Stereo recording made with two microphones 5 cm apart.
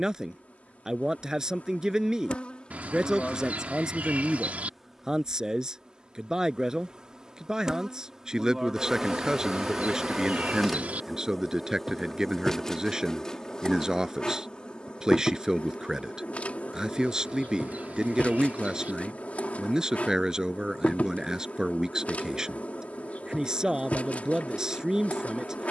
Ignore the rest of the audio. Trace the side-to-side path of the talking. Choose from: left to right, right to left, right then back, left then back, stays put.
stays put.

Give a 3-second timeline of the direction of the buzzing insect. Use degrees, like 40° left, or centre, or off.
30° left, centre, 10° right, centre, 10° left, 30° left, 30° left, 30° left, 30° left.